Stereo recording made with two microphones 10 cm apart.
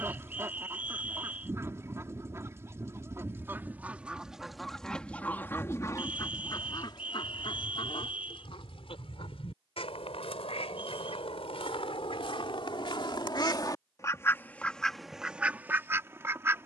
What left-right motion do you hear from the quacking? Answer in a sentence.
You can hear the quacking move from right to left and back again.